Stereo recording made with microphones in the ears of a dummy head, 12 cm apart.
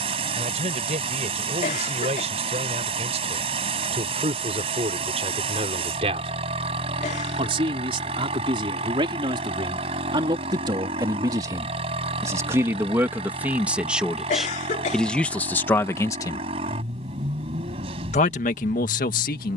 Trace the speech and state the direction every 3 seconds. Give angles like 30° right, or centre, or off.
50° right, 50° right, 40° right, 30° right, 10° right, 20° left, 60° left.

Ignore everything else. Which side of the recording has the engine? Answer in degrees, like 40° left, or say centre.
40° right.